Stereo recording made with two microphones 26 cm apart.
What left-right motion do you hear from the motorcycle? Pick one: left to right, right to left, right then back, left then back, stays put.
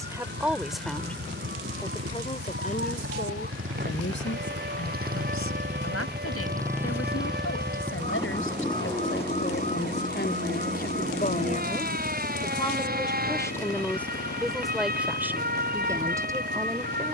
right to left.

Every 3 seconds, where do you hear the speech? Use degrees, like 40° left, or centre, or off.
10° left, 50° left, 60° left, 40° left, 10° left, 10° right.